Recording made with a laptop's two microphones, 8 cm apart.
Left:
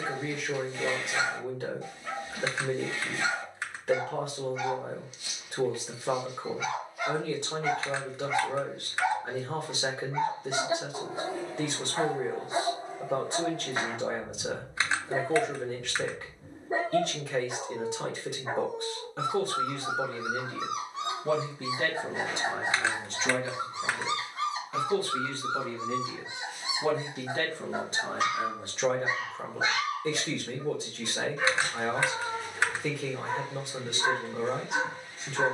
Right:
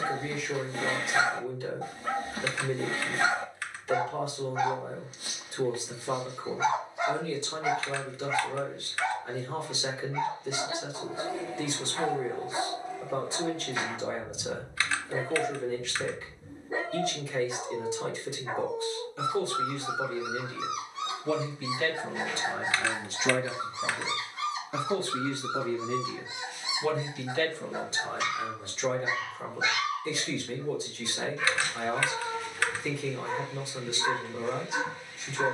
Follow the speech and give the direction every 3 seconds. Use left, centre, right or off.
left, left, left, left, left, left, left, centre, centre, left, left, left.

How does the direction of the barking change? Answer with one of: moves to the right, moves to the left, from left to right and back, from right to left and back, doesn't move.
moves to the left.